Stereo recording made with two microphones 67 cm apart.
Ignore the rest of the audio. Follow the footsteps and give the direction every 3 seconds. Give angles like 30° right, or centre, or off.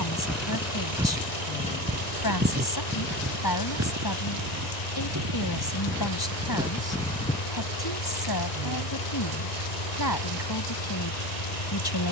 10° right, 20° right, centre, off.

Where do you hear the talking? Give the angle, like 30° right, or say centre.
30° left.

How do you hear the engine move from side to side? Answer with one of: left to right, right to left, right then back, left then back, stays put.
stays put.